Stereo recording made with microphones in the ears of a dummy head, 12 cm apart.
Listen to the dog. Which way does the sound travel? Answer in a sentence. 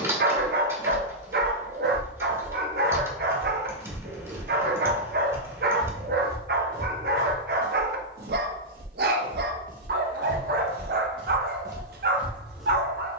In this clip you hear the dog stay put.